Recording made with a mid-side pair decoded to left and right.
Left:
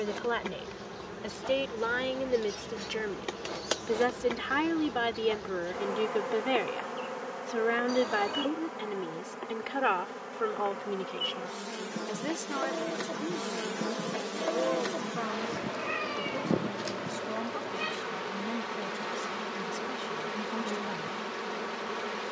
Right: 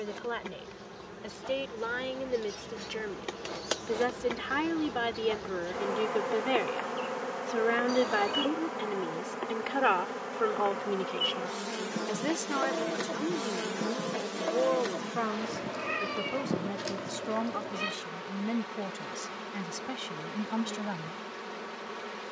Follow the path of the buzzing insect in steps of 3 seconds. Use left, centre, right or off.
left, centre, right, right, centre, left, left, left.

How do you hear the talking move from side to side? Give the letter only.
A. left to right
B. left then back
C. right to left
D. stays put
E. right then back
A.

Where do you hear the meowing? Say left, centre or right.
centre.